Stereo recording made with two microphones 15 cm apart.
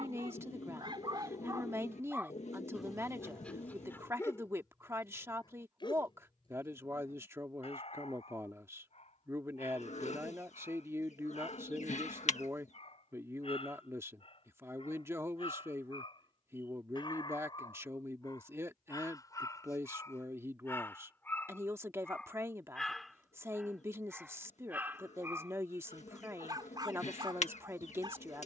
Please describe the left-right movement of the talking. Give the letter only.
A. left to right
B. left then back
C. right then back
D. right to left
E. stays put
E.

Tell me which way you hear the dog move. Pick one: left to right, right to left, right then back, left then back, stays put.
left then back.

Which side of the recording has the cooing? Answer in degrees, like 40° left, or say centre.
50° left.